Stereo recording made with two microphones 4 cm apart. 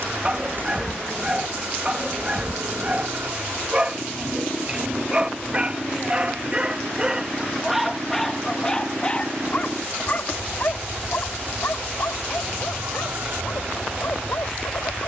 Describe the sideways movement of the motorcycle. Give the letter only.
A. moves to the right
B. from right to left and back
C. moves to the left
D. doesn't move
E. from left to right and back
D.